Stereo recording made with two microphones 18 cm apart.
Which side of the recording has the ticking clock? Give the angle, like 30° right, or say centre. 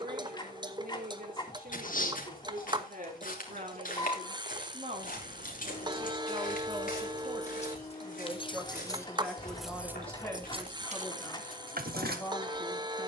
30° right.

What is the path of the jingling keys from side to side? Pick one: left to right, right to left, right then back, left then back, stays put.
left to right.